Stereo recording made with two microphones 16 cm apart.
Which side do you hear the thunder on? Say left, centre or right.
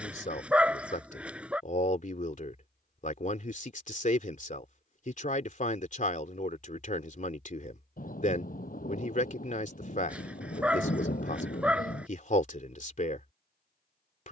left.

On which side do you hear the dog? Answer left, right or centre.
centre.